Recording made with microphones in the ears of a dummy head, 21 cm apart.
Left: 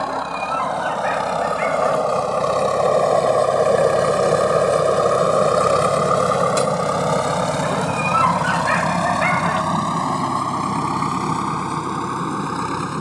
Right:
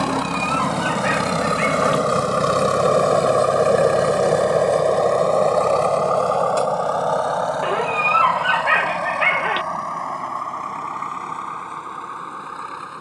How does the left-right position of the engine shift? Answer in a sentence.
You can hear the engine move to the left.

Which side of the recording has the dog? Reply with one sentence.
In this clip you hear the dog on the right.